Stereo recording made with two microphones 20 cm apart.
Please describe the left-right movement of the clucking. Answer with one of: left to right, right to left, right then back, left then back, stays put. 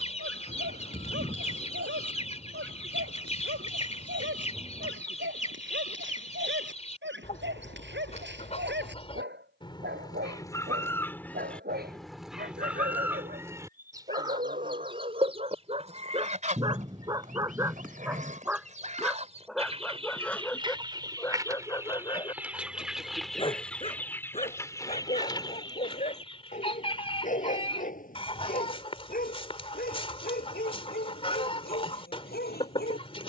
right then back.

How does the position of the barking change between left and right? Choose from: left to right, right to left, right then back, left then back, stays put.
right to left.